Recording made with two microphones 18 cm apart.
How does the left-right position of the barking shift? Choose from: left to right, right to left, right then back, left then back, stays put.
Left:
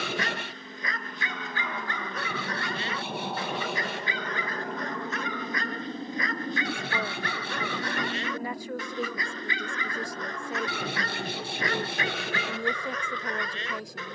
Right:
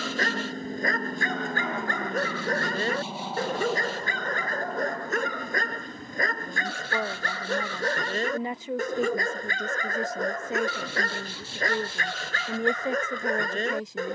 stays put.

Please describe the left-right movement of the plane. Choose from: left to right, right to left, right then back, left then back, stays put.
right to left.